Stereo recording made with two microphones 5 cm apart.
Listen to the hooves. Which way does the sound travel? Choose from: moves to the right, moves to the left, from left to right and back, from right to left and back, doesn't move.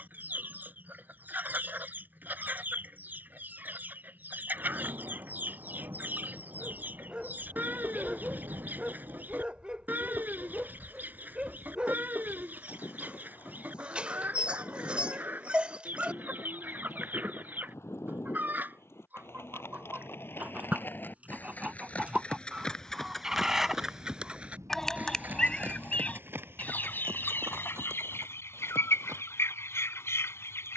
moves to the right.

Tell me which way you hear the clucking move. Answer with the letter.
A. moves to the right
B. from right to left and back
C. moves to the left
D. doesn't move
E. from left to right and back
C.